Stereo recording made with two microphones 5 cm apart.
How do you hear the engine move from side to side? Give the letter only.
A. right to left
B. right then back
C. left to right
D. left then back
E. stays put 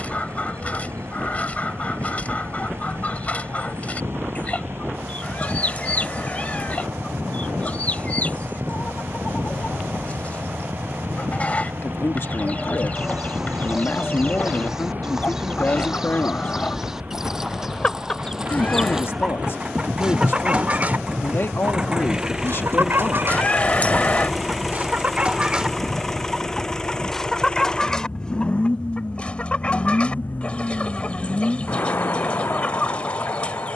A.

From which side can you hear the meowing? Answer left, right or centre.
left.